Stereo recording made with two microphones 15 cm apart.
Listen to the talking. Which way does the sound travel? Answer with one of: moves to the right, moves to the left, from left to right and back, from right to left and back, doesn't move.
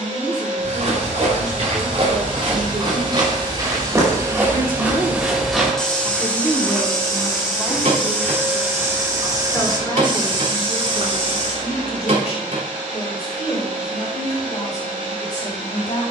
moves to the left.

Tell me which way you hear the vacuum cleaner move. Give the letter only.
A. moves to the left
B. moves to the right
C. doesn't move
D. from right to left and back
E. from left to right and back
D.